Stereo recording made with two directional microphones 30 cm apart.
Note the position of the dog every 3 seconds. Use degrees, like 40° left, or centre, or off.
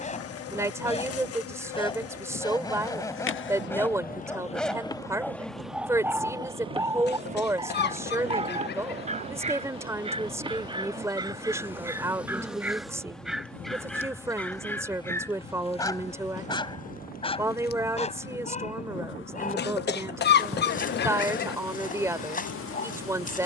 20° left, centre, 10° right, 20° right, centre, 20° left, 30° left, 30° left.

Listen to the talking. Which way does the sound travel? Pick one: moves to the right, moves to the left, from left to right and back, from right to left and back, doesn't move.
doesn't move.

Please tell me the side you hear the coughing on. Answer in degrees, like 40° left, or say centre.
40° left.